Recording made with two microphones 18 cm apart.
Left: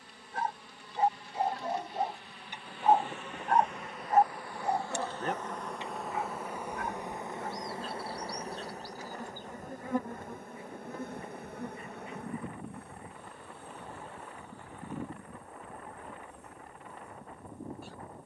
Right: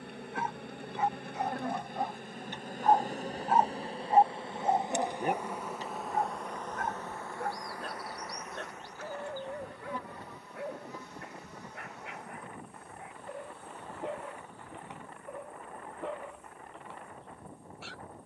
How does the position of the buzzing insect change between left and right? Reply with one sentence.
In this clip you hear the buzzing insect go from the right side to the left.